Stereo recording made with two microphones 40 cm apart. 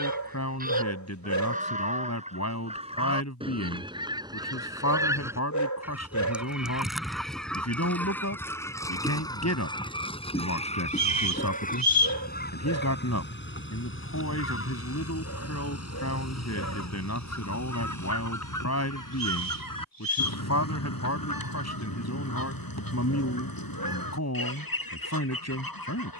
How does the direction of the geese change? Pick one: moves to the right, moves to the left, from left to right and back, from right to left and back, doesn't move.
moves to the left.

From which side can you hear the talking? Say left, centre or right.
left.